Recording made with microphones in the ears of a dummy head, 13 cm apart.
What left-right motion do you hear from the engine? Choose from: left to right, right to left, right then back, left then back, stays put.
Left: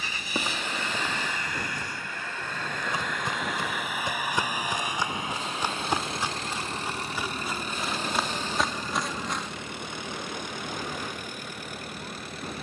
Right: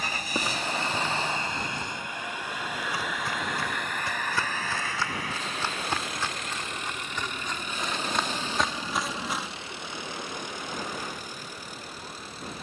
right to left.